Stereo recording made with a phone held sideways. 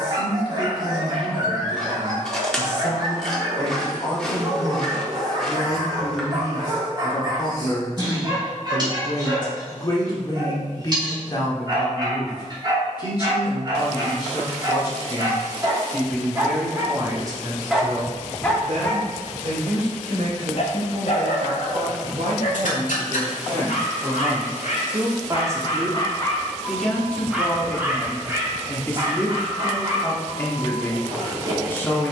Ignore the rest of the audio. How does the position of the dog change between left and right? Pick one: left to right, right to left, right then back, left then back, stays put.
left then back.